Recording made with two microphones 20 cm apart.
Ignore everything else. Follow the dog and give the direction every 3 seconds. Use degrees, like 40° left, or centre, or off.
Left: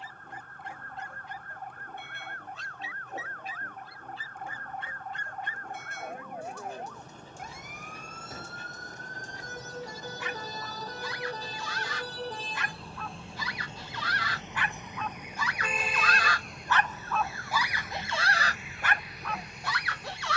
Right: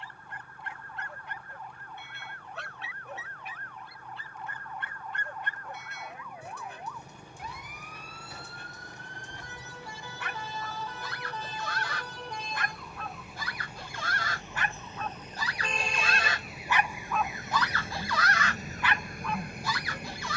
70° right, 60° right, 60° right, 60° right, 50° right, 20° right, 50° left.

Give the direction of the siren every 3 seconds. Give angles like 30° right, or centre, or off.
50° left, 50° left, 50° left, 40° left, 30° left, 10° right, 50° right.